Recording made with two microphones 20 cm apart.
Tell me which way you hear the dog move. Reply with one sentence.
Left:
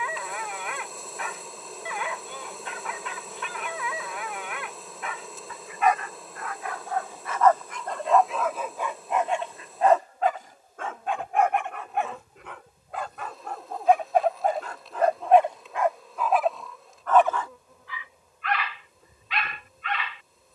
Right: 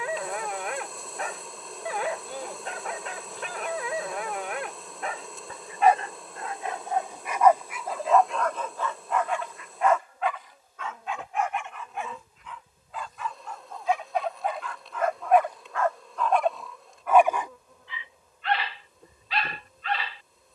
In this clip you hear the dog go left and come back.